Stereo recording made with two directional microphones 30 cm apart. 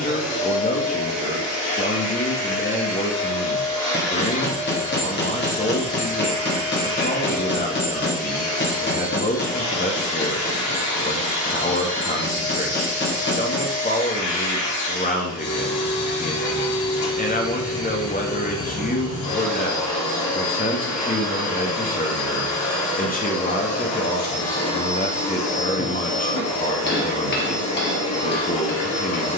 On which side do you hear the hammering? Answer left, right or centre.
left.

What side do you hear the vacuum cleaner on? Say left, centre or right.
left.